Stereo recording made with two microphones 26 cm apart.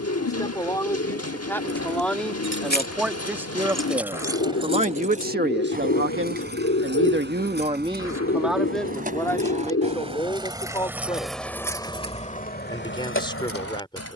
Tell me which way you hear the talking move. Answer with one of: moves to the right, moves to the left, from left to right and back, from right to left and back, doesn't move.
from left to right and back.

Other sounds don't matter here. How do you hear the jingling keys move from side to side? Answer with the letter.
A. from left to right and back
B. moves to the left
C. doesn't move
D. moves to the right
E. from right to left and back
A.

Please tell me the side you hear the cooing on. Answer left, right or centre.
left.